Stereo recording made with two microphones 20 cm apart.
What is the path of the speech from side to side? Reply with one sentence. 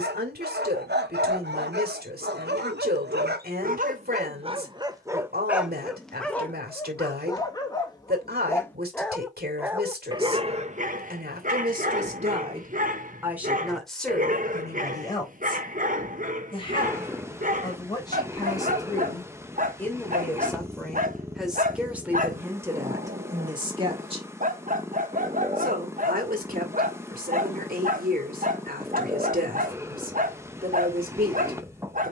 You can hear the speech move from right to left and back again.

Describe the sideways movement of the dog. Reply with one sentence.
You can hear the dog move from right to left and back again.